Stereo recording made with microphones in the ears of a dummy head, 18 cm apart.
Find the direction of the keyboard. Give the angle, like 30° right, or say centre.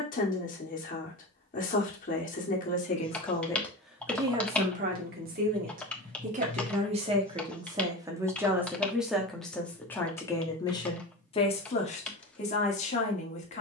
10° left.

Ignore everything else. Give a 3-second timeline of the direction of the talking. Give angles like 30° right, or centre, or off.
40° left, 20° right, 20° right, 20° left, 30° left.